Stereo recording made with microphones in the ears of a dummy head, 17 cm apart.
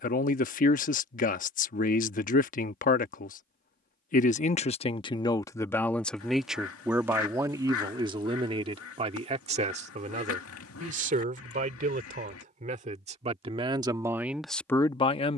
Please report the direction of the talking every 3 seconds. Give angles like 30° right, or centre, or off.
40° left, 30° left, 20° right, 40° right, 20° right.